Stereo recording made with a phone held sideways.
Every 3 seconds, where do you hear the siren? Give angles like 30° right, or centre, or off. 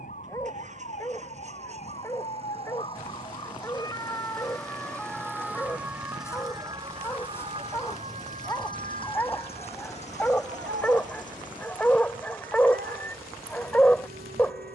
50° left, 10° left, 30° right, 60° right, 70° right.